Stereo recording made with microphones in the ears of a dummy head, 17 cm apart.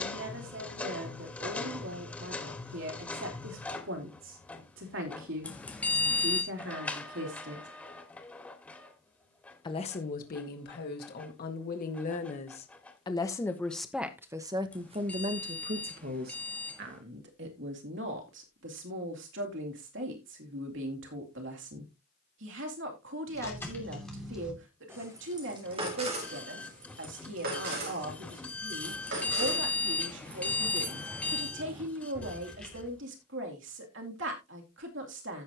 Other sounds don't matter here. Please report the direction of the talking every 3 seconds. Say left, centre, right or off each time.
right, right, right, left, centre, right, right, right, right, right, right, right.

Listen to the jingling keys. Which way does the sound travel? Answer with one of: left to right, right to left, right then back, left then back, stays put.
right then back.